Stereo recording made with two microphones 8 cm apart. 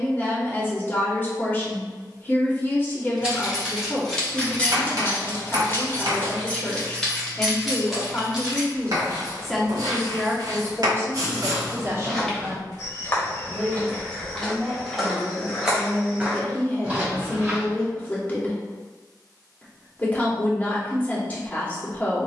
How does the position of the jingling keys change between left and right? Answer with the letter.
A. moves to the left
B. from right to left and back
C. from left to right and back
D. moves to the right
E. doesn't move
B.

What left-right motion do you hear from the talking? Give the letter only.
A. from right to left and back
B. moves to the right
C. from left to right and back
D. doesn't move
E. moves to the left
C.